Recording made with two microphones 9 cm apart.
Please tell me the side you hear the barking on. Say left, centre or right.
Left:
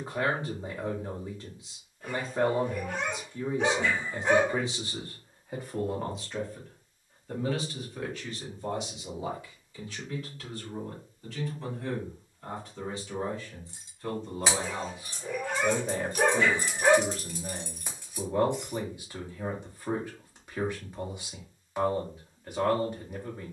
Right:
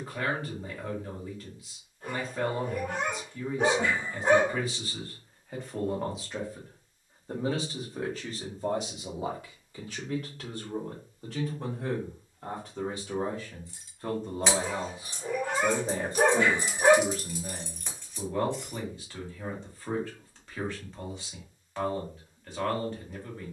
right.